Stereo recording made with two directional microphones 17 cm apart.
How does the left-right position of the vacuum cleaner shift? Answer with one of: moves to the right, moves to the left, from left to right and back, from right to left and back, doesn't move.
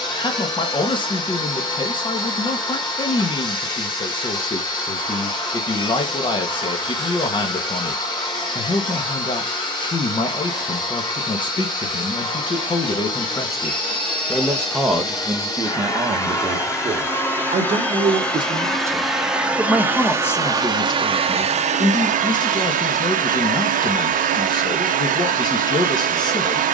moves to the right.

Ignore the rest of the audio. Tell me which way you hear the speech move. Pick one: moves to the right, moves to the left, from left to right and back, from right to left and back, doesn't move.
from left to right and back.